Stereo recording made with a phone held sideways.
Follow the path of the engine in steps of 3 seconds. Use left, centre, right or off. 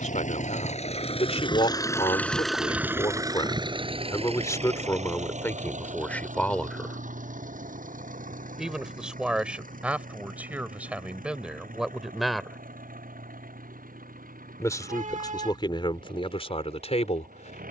left, right, right, right, right, right.